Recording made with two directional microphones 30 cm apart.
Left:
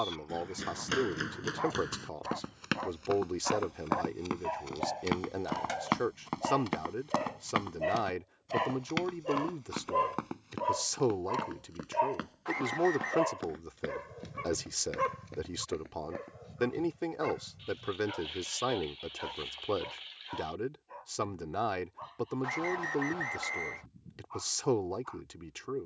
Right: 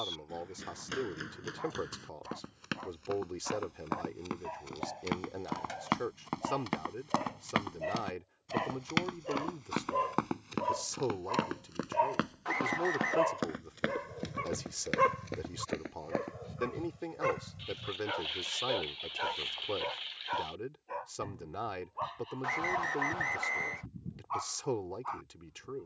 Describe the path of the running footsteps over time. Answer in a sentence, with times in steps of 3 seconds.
You can hear the running footsteps on the left from 0 s, in the centre from 6 s, on the right from 9 s and not at all from 18 s.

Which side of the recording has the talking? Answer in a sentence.
In this clip you hear the talking on the left.